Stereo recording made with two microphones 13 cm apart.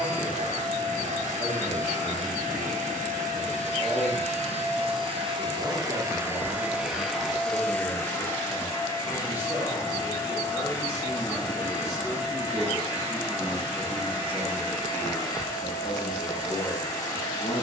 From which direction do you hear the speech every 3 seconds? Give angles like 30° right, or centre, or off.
20° right, 20° right, 20° right, 10° right, 10° left, 30° left.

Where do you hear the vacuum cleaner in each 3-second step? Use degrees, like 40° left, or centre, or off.
70° right, 50° right, centre, 30° left, 30° left, 30° left.